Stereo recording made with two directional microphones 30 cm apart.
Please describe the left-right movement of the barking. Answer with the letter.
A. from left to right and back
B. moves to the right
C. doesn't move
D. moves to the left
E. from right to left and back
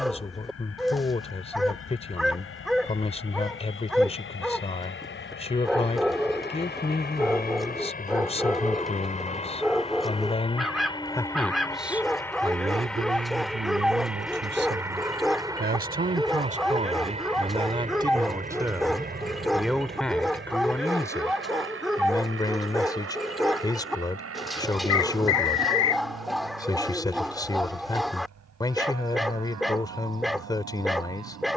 C.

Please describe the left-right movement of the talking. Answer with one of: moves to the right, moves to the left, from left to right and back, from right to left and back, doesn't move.
from left to right and back.